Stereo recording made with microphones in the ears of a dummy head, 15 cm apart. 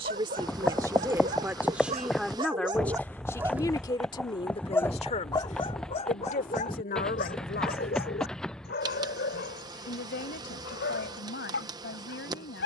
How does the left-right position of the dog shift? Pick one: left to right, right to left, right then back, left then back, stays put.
right to left.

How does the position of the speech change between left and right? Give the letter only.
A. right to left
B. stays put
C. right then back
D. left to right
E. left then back
A.